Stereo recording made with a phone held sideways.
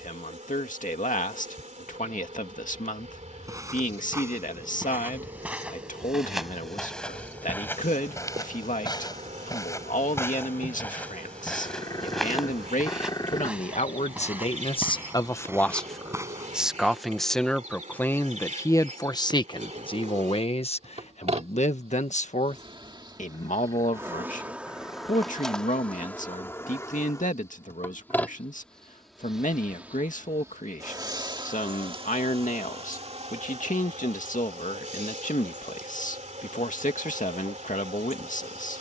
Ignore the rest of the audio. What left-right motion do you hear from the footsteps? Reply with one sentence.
In this clip you hear the footsteps move from right to left and back again.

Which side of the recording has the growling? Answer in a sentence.
You can hear the growling on the left.